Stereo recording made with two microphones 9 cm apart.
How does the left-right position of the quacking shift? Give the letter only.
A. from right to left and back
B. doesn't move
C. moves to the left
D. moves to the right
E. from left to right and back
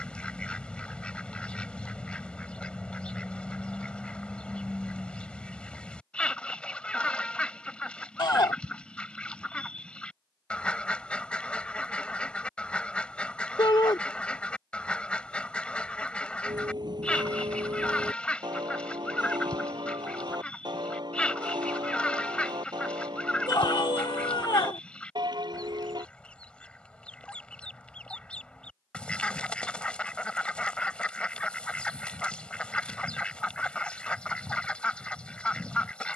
B.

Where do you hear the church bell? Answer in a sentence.
In this clip you hear the church bell on the right.